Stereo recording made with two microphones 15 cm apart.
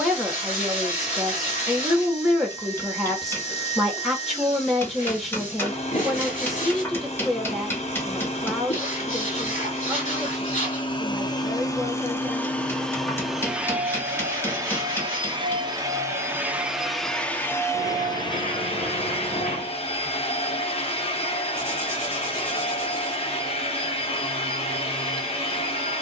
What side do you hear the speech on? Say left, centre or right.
centre.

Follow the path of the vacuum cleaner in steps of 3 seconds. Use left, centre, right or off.
left, left, left, left, centre, centre, left, left, left.